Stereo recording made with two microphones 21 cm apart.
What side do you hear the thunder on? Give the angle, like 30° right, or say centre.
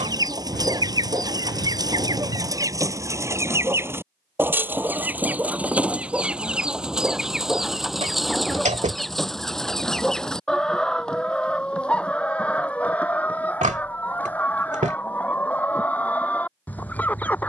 60° left.